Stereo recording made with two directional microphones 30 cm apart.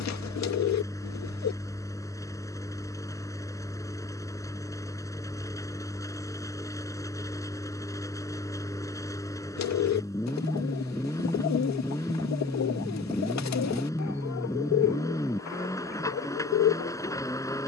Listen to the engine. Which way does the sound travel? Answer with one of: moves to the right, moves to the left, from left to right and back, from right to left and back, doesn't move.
doesn't move.